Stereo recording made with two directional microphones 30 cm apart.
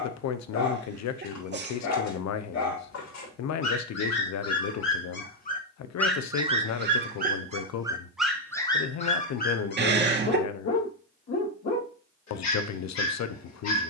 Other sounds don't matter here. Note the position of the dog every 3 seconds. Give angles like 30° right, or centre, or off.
60° left, 50° left, 10° right, 40° left, 60° left.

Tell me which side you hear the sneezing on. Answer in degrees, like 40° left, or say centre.
40° right.